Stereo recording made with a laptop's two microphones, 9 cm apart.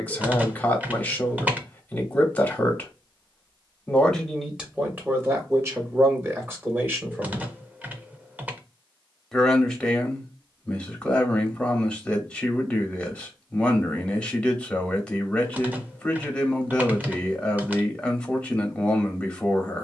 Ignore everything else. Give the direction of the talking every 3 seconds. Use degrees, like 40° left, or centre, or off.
20° left, 10° right, 20° right, 10° left, 10° left, 10° left, 10° left.